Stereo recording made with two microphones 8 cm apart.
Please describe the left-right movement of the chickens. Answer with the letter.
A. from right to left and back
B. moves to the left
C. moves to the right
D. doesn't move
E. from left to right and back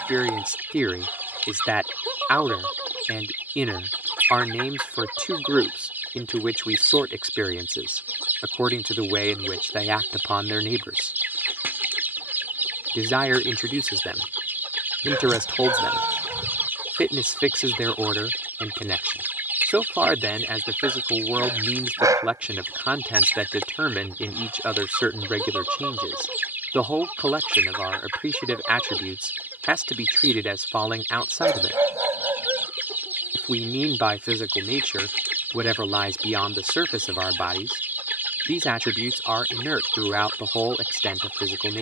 D.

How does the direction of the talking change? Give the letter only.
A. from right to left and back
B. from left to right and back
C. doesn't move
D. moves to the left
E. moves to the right
C.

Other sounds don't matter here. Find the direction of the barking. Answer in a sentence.
You can hear the barking on the right.